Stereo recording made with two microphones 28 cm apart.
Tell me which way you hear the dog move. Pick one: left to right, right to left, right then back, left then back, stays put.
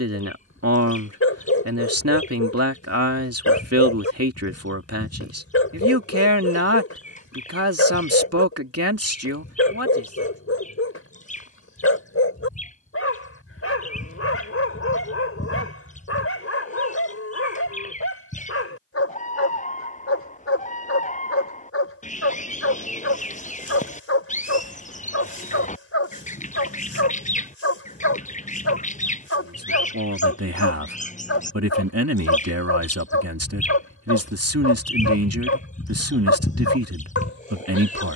stays put.